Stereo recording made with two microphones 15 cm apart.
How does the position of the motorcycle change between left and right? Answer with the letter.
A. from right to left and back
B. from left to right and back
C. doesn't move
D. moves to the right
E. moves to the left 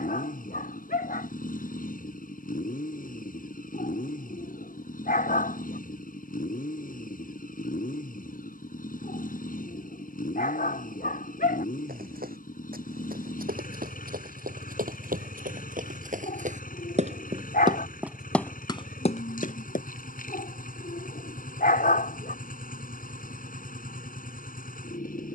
C.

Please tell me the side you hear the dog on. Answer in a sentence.
You can hear the dog on the left.